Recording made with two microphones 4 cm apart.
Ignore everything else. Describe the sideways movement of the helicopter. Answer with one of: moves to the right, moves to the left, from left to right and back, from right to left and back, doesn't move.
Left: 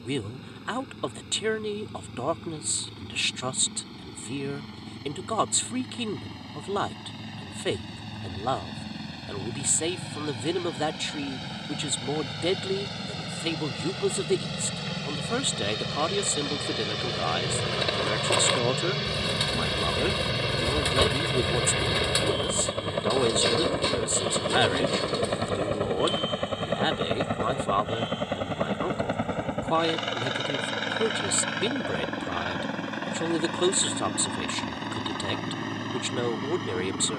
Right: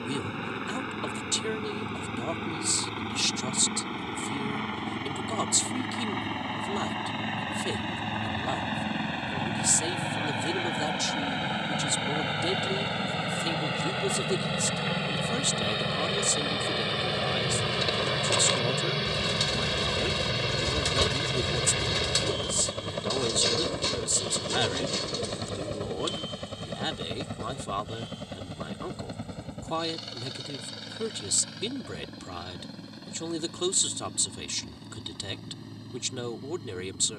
moves to the left.